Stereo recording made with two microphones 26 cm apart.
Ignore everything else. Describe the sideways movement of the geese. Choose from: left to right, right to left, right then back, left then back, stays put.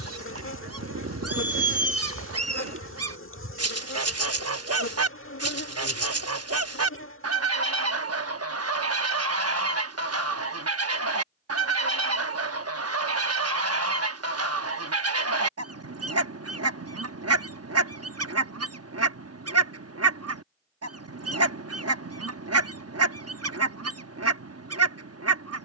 stays put.